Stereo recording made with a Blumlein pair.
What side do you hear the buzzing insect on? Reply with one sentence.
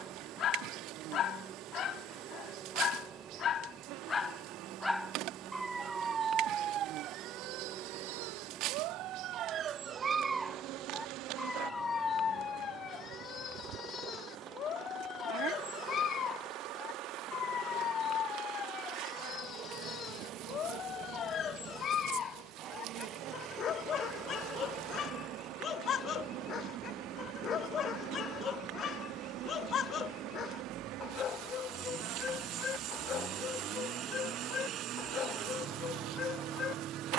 In this clip you hear the buzzing insect on the right.